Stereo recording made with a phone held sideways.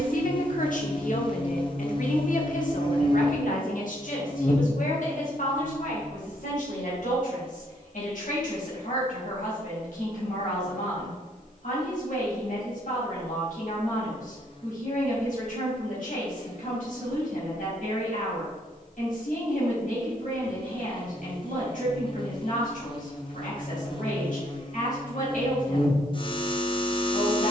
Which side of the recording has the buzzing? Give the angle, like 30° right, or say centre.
40° left.